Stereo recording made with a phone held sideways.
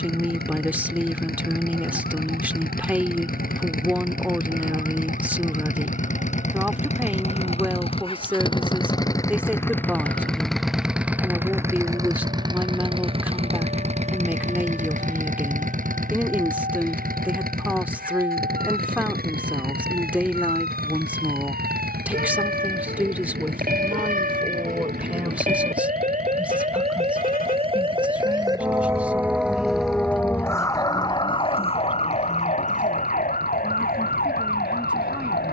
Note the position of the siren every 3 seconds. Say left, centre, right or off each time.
right, right, right, right, right, right, right, right, right, right, left, left.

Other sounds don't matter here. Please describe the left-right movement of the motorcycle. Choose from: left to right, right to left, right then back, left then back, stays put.
left to right.